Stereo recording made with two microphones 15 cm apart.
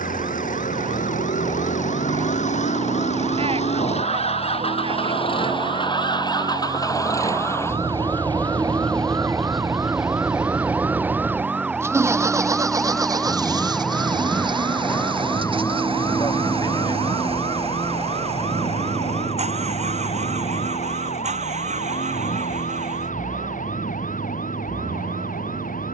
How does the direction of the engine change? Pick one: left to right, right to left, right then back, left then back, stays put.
left to right.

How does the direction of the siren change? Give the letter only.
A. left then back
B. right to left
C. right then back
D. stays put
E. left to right
B.